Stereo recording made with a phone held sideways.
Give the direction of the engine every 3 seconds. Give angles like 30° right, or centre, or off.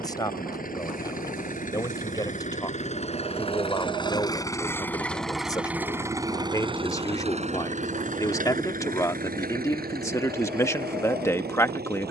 50° left, 20° left, 40° right, 70° right.